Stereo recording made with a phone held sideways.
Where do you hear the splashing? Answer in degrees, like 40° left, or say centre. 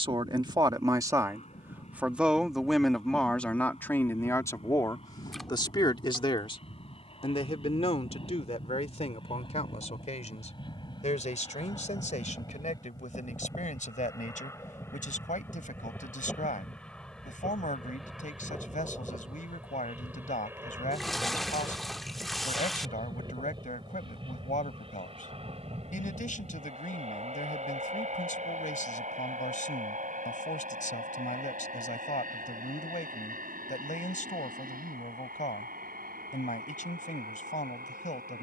centre.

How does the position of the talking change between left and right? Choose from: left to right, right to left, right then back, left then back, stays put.
right to left.